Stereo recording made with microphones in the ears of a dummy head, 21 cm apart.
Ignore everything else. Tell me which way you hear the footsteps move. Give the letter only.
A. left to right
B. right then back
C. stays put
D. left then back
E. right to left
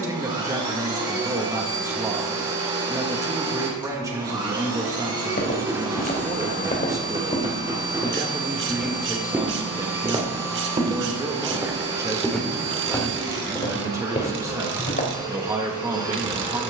B.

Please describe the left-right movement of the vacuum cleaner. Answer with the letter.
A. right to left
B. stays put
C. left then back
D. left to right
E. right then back
B.